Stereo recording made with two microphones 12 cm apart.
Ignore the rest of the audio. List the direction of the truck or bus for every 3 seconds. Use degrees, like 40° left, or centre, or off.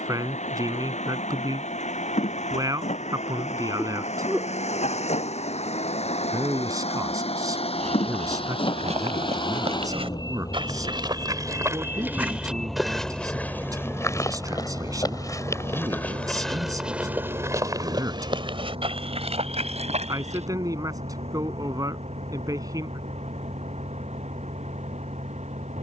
80° left, 70° left, 60° left, 30° left, 10° right, 40° right, 50° right, 60° right, 70° right.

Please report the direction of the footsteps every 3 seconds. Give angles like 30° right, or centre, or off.
off, off, 70° right, 40° right, 10° left, centre, 60° right, off, off.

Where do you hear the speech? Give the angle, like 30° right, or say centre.
30° right.